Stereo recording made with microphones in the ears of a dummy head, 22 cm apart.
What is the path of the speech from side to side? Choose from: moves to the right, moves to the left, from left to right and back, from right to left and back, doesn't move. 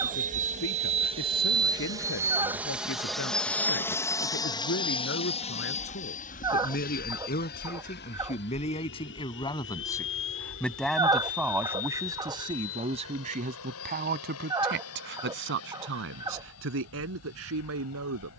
moves to the right.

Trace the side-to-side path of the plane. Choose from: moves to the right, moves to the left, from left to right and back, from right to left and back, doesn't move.
moves to the left.